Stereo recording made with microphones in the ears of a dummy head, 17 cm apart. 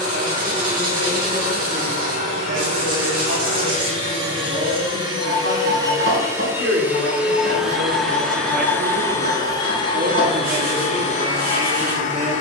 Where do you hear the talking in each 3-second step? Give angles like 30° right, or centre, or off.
80° right, 70° right, 60° right, 50° right.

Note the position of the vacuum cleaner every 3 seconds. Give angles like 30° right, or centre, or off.
40° right, 30° right, centre, 30° left.